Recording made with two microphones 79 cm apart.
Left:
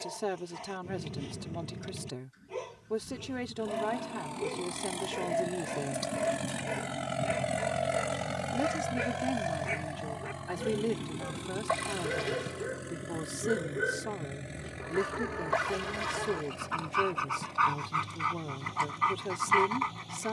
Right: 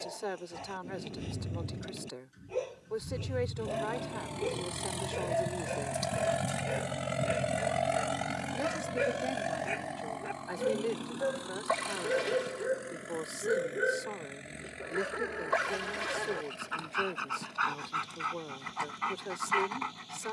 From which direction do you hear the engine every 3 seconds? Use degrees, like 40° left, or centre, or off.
70° right, 50° right, centre, 50° left, 70° left, 80° left, 80° left.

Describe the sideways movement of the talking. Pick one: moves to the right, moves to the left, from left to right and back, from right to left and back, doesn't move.
doesn't move.